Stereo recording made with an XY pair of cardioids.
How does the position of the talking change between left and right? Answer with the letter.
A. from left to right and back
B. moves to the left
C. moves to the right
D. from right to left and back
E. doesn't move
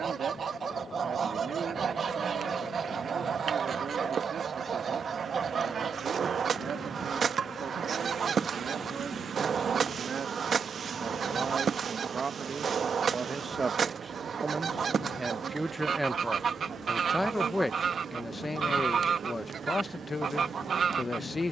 B.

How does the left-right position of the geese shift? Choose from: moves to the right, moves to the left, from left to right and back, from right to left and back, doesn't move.
doesn't move.